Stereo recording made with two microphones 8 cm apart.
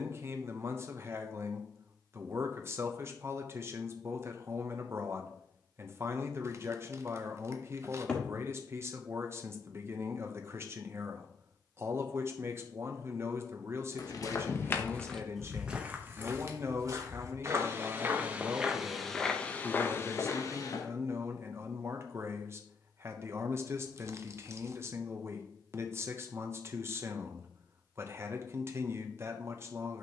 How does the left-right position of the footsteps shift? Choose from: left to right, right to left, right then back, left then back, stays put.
right then back.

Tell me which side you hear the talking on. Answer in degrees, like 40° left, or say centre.
30° right.